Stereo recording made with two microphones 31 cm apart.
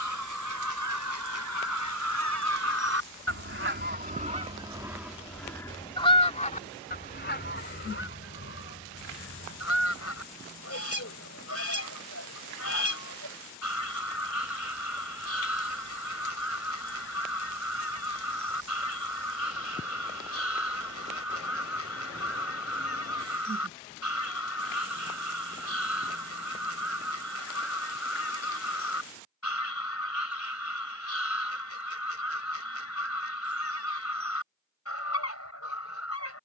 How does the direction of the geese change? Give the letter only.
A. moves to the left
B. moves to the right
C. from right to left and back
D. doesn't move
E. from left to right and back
A.